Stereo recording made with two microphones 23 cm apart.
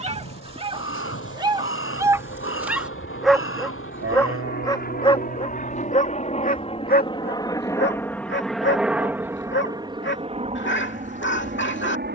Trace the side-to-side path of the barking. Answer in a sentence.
You can hear the barking travel towards the left.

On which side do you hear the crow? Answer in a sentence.
You can hear the crow on the left.